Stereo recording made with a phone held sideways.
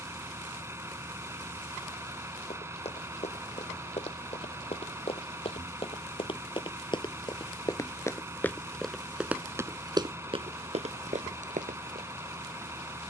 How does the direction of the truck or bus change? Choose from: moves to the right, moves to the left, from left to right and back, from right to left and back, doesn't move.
doesn't move.